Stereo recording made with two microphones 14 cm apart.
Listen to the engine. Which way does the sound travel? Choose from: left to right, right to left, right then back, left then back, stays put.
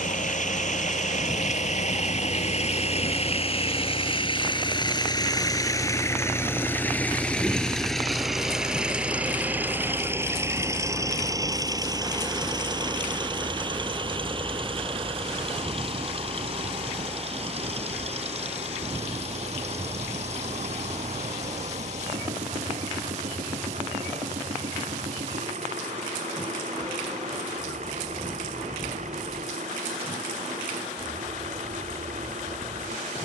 left to right.